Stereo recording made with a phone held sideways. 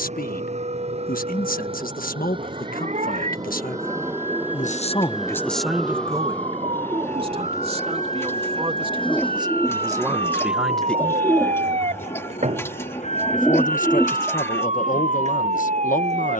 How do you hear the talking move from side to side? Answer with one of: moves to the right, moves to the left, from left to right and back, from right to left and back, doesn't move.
from left to right and back.